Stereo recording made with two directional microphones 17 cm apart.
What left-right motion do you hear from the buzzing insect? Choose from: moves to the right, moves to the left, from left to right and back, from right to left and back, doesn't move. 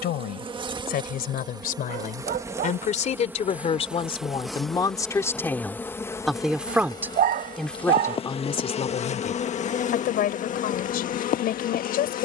moves to the left.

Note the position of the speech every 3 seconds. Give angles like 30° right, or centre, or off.
60° left, 30° left, 10° left, 60° left.